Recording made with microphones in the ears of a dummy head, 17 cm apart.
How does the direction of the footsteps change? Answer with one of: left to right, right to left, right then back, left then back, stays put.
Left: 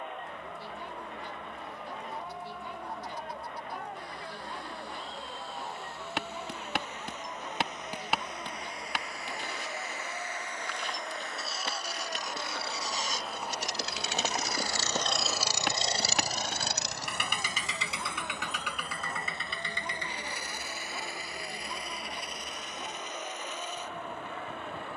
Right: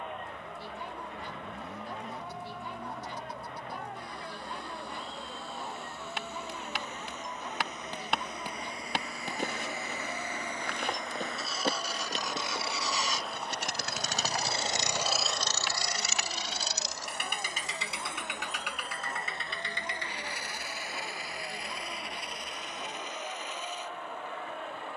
right then back.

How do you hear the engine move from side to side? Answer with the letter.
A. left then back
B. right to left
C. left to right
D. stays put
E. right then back
B.